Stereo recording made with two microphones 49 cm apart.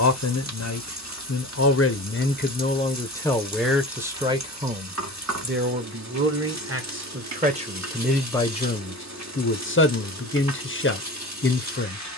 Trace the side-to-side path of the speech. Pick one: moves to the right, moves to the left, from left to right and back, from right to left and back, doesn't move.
from left to right and back.